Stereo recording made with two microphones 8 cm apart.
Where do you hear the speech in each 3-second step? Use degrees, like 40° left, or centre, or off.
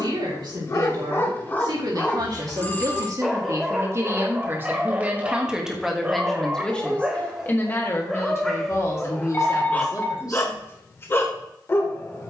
60° right, 30° right, 20° left, 50° left.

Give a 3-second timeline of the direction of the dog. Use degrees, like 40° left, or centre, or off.
20° left, 10° right, 10° right, 20° left.